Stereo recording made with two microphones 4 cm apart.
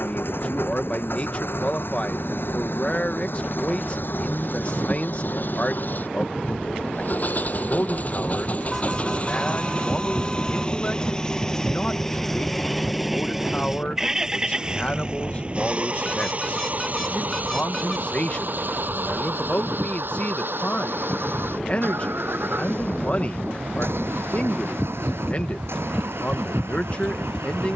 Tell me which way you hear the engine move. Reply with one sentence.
You can hear the engine move from left to right.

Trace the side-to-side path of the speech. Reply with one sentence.
You can hear the speech stay in one place.